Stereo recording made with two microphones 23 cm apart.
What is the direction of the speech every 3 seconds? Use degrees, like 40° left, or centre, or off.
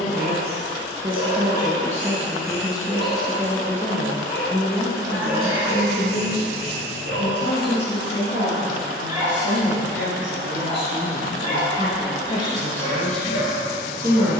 20° right, 20° left, 50° left, 50° left, centre.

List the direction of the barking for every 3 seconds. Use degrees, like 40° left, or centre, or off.
30° left, centre, 40° right, 10° left, 40° left.